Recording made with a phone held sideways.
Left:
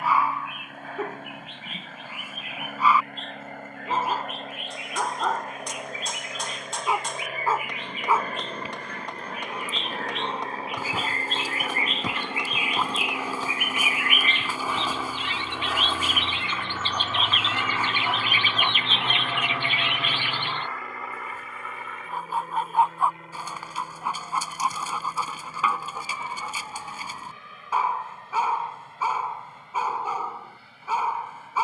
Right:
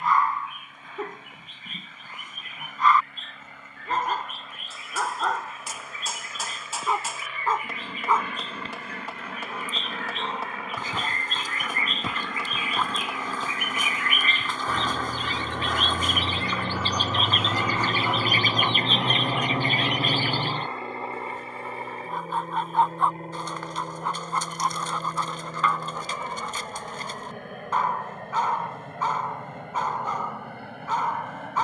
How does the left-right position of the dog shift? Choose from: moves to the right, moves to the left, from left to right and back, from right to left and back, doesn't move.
doesn't move.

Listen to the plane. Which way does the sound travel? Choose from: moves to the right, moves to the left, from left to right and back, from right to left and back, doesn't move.
moves to the right.